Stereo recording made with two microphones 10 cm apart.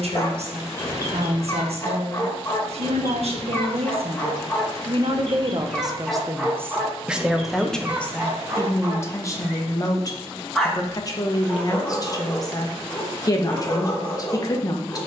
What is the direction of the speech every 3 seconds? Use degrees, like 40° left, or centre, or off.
70° right, 60° right, centre, 30° left, 40° left.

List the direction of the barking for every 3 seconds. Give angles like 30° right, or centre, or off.
30° left, 20° left, 10° right, centre, 20° left.